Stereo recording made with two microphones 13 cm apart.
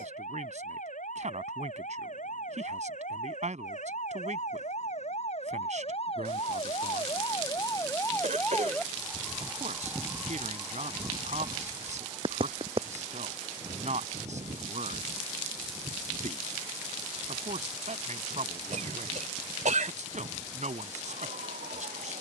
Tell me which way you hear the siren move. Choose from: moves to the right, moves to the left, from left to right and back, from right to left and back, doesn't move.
moves to the right.